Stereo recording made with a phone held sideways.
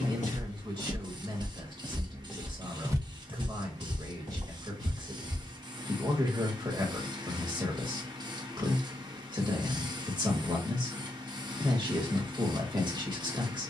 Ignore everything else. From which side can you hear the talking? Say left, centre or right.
right.